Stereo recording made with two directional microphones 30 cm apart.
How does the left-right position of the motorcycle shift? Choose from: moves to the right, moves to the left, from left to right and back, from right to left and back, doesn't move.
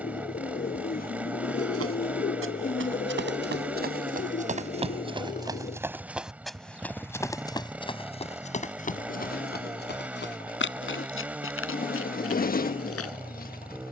doesn't move.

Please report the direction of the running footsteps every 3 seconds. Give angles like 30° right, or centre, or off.
40° right, 20° right, 10° left, 40° left, 50° left.